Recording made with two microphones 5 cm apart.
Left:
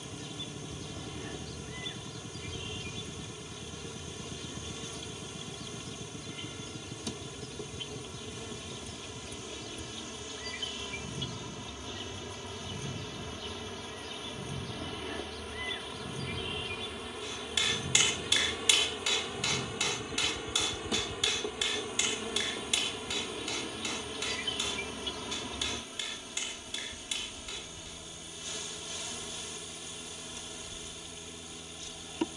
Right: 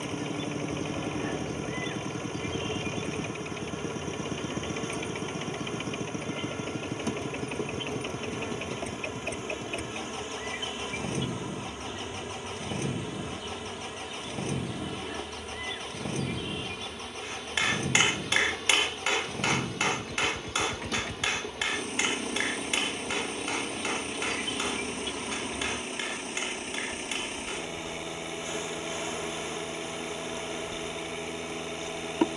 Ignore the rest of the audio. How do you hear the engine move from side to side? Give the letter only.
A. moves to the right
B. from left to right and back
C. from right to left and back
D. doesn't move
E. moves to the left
D.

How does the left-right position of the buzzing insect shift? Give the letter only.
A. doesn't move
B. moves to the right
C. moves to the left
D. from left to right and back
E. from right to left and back
E.